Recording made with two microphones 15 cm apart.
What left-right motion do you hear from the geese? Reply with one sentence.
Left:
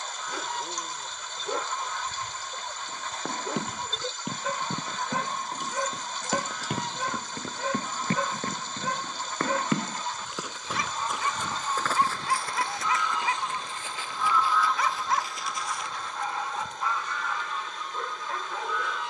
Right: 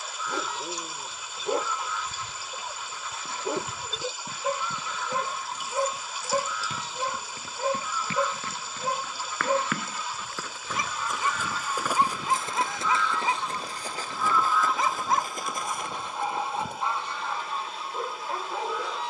You can hear the geese go from the left side to the right.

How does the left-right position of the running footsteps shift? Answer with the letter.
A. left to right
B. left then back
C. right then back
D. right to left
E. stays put
A.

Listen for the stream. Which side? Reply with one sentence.
In this clip you hear the stream in the centre.